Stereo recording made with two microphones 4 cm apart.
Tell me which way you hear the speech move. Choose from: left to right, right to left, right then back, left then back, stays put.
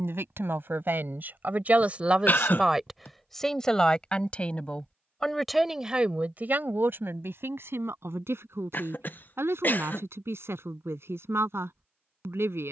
left then back.